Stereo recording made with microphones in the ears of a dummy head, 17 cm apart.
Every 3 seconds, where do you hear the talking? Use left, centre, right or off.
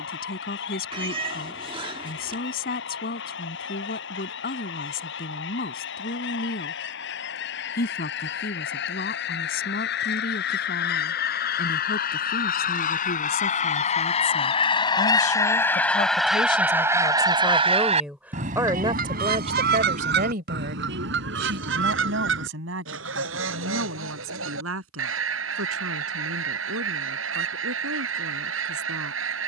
left, left, left, left, left, left, right, right, right, right.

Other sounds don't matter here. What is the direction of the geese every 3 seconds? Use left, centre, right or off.
left, left, left, left, left, centre, right, right, right, right.